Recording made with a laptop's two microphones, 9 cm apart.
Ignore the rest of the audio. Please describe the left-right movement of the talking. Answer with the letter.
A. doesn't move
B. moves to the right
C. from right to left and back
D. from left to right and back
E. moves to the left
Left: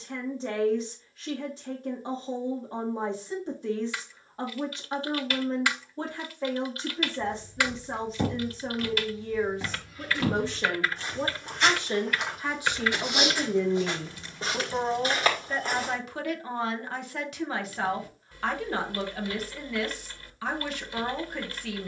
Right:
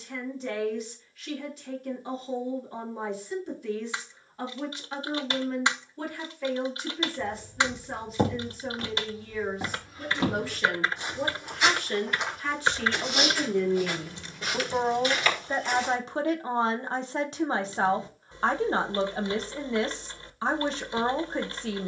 B.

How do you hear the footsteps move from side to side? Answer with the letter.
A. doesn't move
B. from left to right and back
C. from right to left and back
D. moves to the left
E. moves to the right
D.